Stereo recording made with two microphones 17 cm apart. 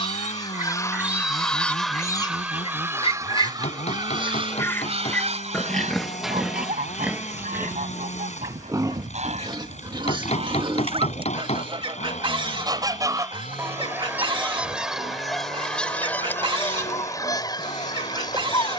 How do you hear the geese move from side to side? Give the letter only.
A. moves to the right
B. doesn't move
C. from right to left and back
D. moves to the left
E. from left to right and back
E.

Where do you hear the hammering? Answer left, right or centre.
left.